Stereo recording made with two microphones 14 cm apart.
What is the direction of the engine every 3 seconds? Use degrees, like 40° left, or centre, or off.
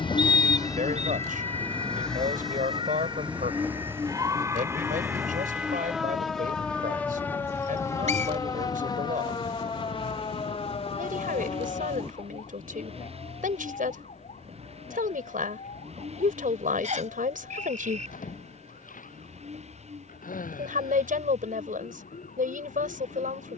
10° left, 20° right, 30° right, 40° right, 50° right, 50° right, 50° right, 50° right.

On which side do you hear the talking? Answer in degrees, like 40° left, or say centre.
70° right.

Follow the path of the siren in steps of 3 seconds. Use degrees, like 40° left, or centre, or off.
50° right, 20° right, 10° left, 40° left, 50° left, 60° left, 70° left, 70° left.